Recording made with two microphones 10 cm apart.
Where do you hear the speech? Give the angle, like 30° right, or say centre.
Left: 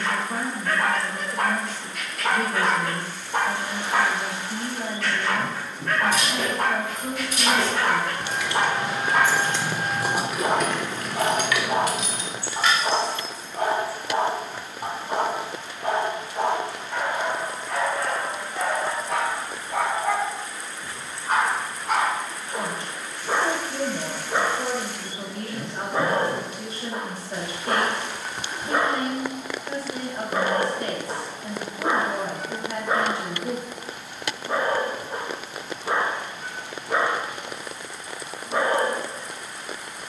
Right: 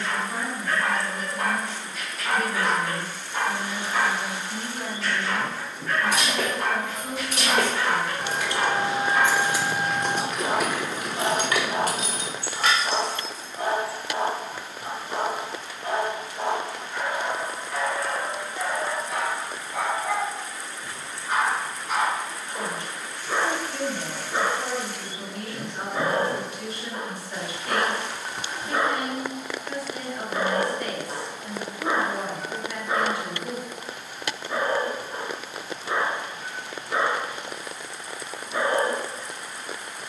30° left.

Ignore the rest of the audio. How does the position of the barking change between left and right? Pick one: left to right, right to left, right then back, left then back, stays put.
stays put.